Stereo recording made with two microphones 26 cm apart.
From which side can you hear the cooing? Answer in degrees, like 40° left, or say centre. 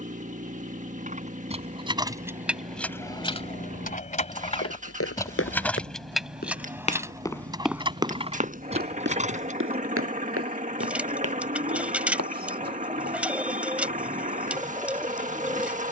10° right.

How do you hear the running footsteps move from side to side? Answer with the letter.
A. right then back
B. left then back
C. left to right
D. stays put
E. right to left
C.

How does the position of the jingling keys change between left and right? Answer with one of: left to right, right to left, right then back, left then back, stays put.
left then back.